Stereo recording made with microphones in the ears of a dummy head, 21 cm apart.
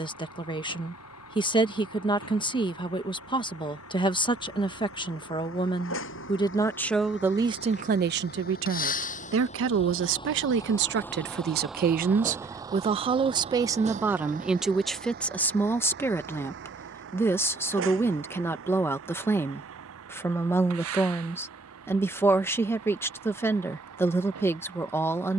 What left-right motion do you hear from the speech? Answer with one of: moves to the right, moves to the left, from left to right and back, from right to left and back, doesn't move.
from left to right and back.